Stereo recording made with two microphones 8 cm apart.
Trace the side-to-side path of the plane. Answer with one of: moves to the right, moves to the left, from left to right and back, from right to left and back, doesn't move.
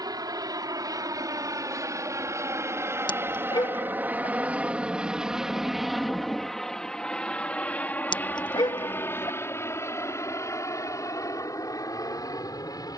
moves to the left.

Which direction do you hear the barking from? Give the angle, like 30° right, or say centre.
70° left.